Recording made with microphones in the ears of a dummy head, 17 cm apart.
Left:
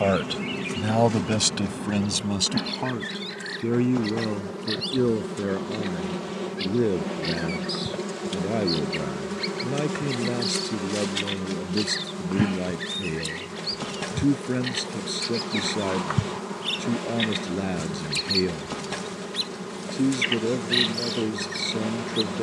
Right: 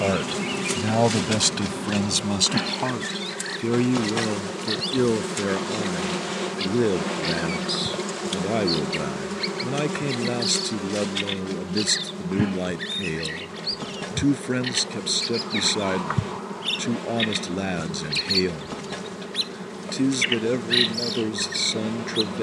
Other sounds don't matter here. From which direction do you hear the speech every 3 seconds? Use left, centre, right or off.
centre, right, right, right, right, right, right, right.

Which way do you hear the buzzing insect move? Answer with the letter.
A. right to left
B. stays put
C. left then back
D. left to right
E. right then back
A.